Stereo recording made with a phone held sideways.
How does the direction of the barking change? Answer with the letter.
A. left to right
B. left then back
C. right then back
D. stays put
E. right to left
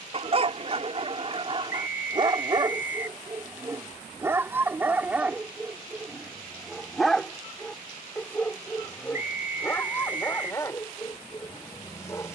E.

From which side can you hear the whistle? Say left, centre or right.
left.